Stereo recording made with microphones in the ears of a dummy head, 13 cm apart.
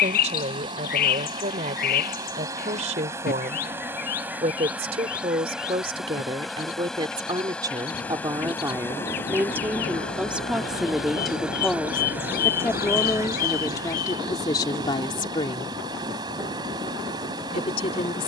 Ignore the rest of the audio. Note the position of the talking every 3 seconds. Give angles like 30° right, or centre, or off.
50° right, 40° right, 30° right, 10° right, 20° left, 30° left.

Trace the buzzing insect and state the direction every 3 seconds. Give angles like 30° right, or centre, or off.
30° right, 10° right, 10° left, centre, 20° right, 30° right.